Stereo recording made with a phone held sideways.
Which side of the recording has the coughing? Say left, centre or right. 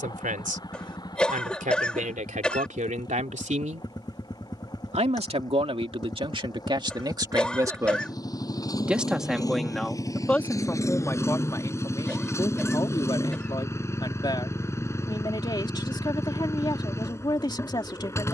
centre.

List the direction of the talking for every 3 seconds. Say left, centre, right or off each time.
right, right, right, centre, left, left.